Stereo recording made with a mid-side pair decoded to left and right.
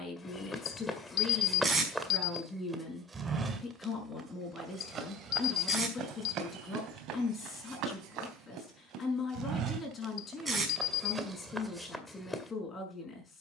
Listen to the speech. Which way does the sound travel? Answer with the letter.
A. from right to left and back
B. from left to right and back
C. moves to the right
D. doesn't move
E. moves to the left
D.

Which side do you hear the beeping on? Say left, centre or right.
left.